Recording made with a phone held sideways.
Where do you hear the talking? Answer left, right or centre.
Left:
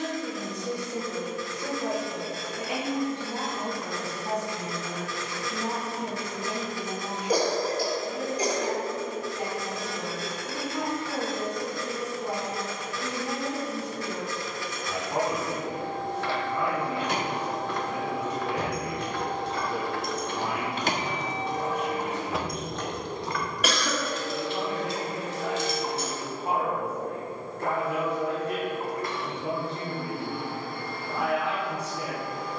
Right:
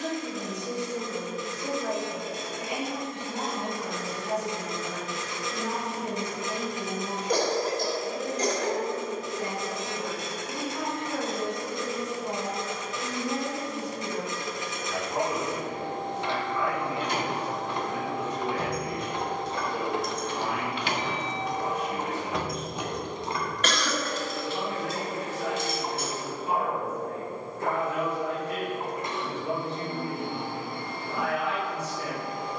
left.